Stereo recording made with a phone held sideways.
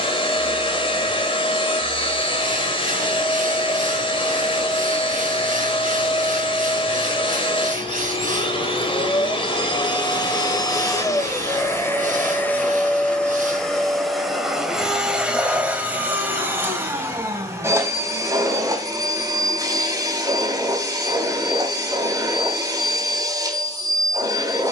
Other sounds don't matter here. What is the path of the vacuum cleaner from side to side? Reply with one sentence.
In this clip you hear the vacuum cleaner move to the right.